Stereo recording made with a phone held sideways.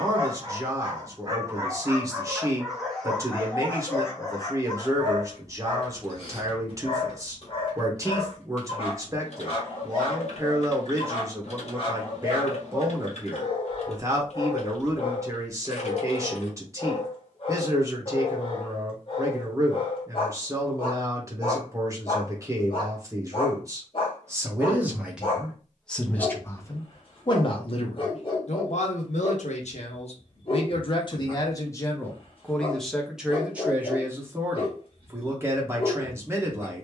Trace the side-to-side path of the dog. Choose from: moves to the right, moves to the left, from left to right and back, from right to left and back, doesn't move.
moves to the left.